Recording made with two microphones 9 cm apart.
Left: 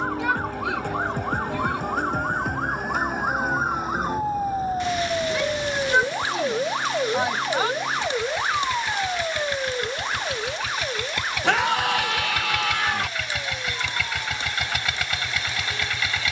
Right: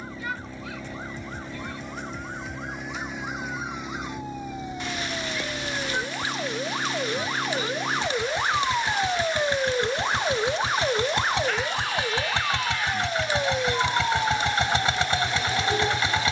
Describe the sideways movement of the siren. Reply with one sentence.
In this clip you hear the siren go from the left side to the right.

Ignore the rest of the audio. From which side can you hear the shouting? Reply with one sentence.
In this clip you hear the shouting on the left.